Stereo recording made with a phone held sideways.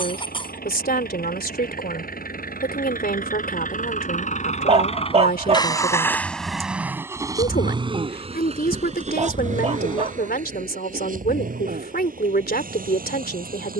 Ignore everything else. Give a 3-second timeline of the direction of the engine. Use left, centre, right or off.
left, left, right, right, right.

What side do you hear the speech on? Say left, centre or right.
left.